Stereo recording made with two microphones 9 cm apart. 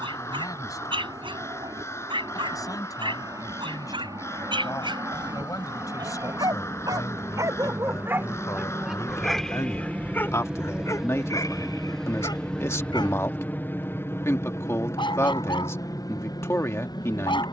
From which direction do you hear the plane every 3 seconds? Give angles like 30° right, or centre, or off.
50° right, 40° right, 30° right, 10° right, 20° left, 40° left.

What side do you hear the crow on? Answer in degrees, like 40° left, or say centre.
30° left.